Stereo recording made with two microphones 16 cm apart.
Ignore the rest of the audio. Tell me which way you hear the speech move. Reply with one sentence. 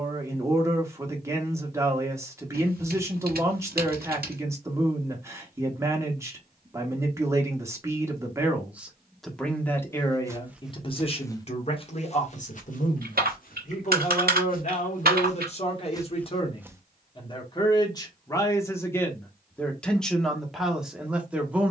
You can hear the speech move from right to left and back again.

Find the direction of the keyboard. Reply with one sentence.
In this clip you hear the keyboard on the right.